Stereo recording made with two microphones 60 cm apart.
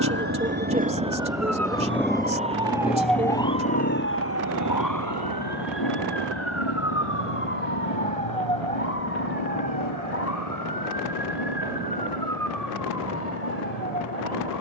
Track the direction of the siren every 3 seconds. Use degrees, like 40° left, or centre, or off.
20° right, 20° left, 60° left, 70° left, 80° left.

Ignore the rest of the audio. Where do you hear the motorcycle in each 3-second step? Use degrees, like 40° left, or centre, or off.
centre, 30° left, 40° left, 50° left, 50° left.